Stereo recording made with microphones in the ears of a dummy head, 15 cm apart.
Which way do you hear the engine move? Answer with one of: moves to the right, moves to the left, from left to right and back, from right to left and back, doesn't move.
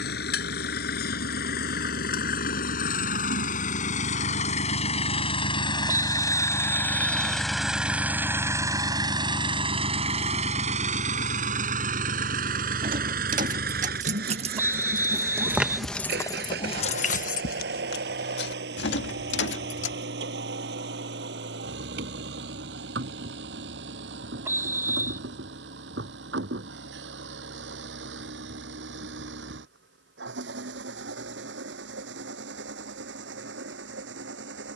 moves to the right.